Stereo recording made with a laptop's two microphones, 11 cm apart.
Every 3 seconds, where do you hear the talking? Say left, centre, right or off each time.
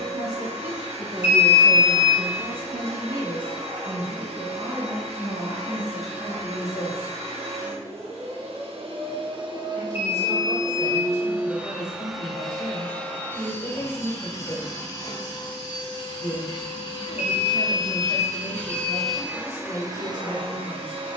right, right, centre, left, left, left, left.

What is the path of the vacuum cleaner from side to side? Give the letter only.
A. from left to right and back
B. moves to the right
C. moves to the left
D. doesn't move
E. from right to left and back
E.